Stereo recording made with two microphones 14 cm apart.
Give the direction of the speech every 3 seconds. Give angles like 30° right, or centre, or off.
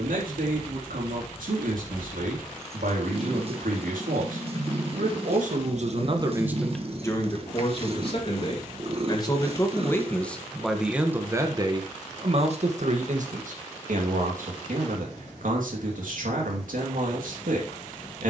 80° right, 70° right, 20° left, centre, 60° right, 80° right.